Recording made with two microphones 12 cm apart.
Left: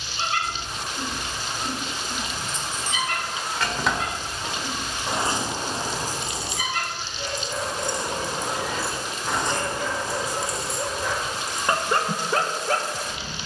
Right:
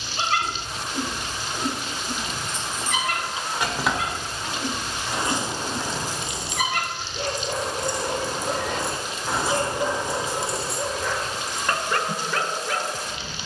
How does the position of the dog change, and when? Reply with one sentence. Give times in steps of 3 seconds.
You can hear the dog on the right from 0 s, in the centre from 9 s and on the left from 12 s.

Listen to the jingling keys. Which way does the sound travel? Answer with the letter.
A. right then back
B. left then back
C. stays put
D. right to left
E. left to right
B.